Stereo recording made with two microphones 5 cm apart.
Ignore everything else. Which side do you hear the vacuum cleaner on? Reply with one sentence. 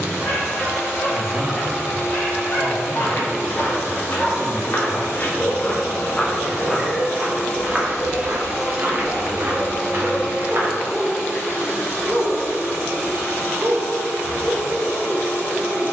In this clip you hear the vacuum cleaner on the left.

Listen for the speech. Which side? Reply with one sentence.
In this clip you hear the speech on the right.